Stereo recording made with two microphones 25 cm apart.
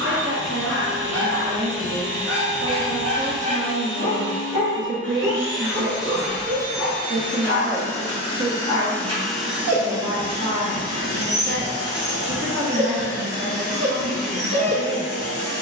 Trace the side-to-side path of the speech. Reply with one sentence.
You can hear the speech stay in one place.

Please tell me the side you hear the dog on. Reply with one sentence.
In this clip you hear the dog on the right.